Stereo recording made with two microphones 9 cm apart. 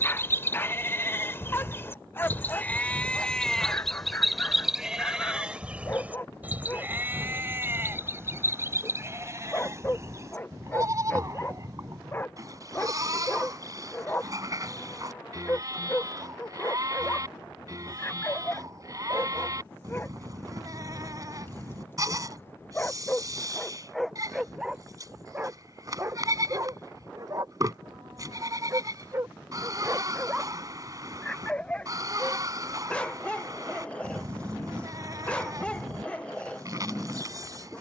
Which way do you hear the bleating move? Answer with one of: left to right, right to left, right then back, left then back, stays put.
left to right.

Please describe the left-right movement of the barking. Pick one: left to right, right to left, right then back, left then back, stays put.
right then back.